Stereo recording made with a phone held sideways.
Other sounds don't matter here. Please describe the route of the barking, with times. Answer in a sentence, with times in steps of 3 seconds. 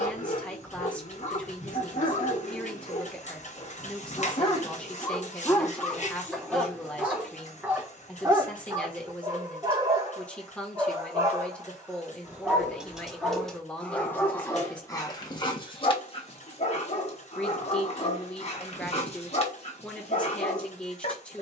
You can hear the barking on the left from 0 s, in the centre from 6 s, on the right from 9 s, in the centre from 12 s and on the left from 15 s.